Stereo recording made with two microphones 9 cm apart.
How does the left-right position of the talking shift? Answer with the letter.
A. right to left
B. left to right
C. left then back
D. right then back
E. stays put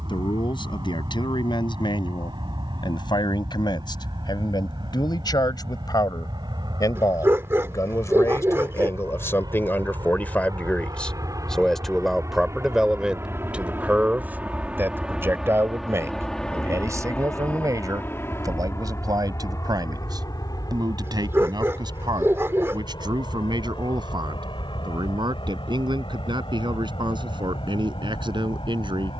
B.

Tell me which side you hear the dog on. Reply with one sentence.
You can hear the dog on the right.